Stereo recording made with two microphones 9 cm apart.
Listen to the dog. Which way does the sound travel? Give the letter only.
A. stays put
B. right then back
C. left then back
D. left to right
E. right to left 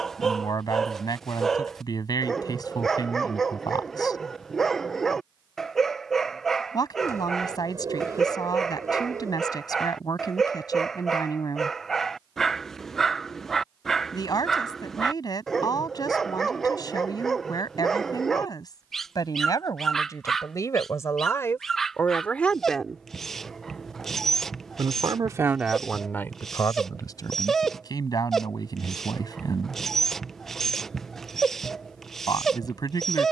A.